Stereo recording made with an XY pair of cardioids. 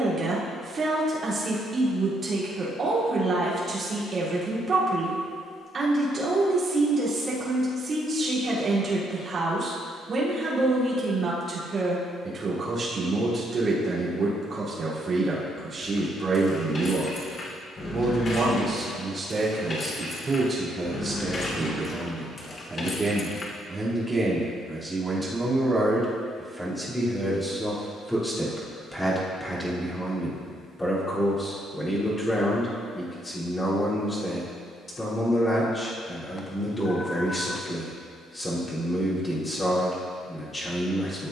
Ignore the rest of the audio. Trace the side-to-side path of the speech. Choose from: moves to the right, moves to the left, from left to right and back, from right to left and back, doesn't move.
moves to the left.